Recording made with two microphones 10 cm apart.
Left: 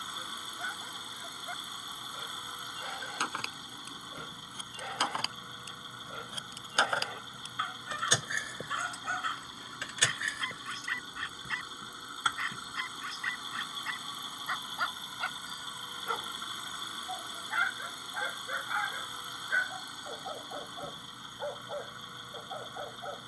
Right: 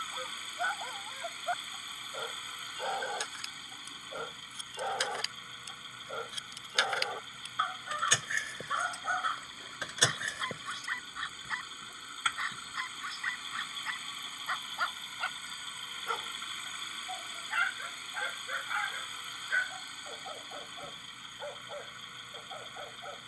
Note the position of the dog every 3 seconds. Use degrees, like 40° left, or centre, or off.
40° right, 30° right, 20° right, 10° right, centre, 10° left, 10° left, 20° left.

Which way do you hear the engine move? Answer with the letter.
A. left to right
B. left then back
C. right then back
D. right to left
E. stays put
E.